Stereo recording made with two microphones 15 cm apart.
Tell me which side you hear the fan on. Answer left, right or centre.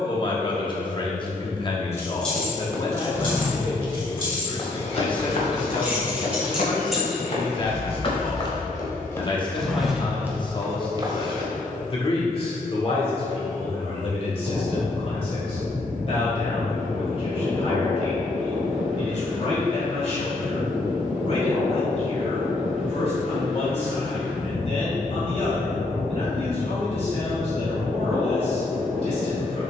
centre.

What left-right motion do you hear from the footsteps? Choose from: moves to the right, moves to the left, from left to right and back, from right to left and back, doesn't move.
from right to left and back.